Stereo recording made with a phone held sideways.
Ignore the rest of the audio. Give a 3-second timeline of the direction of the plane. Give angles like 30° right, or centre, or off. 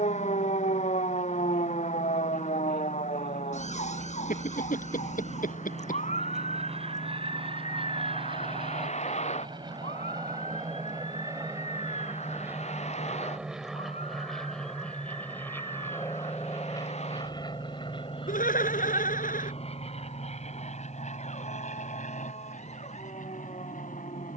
60° right, 50° right, 40° right, 30° right, centre, 20° left, 40° left, 50° left.